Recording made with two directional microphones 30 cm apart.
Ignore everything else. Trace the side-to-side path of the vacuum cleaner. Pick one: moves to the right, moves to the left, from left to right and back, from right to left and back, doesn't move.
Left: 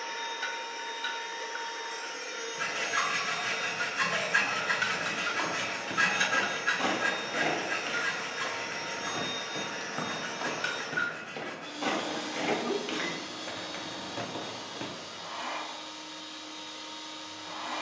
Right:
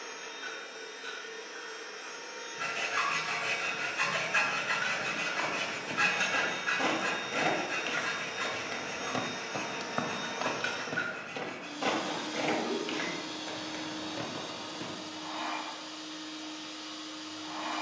moves to the right.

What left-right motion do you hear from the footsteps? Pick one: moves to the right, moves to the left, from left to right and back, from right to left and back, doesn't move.
from left to right and back.